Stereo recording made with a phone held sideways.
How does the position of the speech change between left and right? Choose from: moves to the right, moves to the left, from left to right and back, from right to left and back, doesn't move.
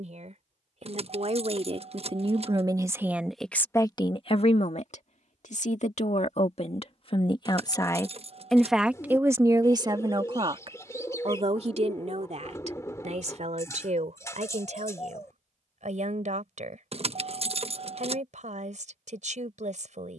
from right to left and back.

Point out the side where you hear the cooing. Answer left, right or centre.
left.